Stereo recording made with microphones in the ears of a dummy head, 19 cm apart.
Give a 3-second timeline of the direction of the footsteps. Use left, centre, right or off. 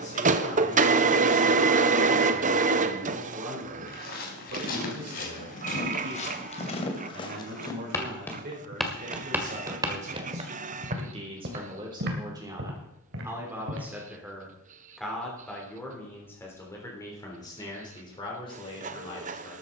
off, left, left, right, right, off, off.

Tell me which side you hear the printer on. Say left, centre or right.
right.